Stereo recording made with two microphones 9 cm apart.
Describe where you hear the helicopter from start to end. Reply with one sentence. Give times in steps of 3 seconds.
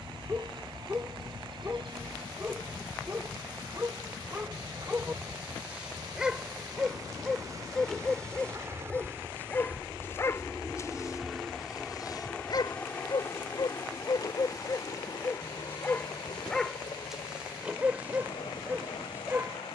In this clip you hear the helicopter on the right from 0 s, in the centre from 9 s and on the left from 12 s.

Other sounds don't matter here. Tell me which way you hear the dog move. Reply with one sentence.
You can hear the dog move from right to left and back again.